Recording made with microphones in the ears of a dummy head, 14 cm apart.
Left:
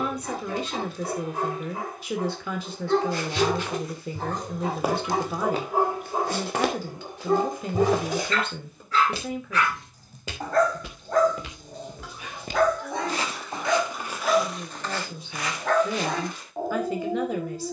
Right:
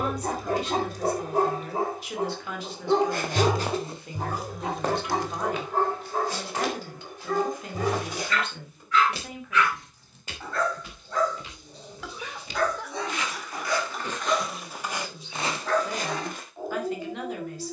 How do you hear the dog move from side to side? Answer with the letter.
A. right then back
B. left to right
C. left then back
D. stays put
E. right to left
E.